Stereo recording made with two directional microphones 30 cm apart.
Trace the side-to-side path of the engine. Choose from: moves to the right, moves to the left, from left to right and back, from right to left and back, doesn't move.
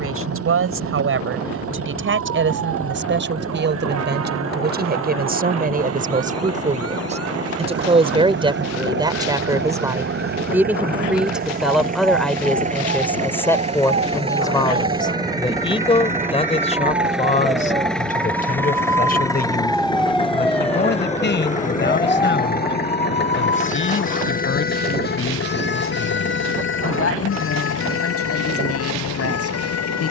moves to the left.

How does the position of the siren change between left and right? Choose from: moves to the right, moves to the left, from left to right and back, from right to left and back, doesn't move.
moves to the left.